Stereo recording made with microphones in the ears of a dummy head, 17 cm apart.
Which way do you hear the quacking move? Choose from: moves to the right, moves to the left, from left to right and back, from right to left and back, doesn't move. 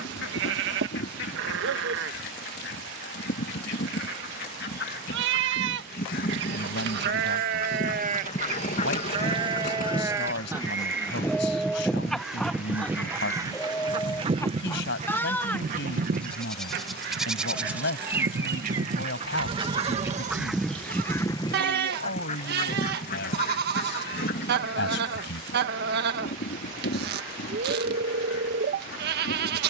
from left to right and back.